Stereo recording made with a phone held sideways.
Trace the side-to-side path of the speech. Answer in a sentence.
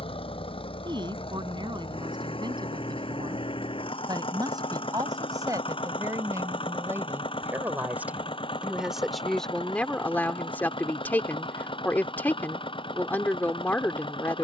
You can hear the speech travel towards the left.